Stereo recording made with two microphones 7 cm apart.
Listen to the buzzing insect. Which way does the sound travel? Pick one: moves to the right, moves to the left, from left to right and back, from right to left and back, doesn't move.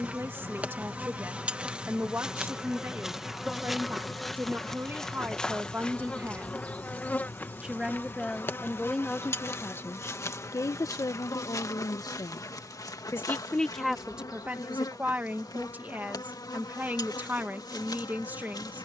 moves to the left.